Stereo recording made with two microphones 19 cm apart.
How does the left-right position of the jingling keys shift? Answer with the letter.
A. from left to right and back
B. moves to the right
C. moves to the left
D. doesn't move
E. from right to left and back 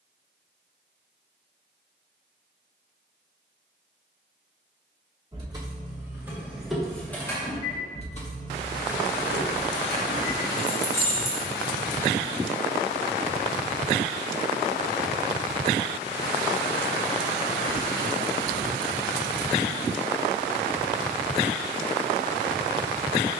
E.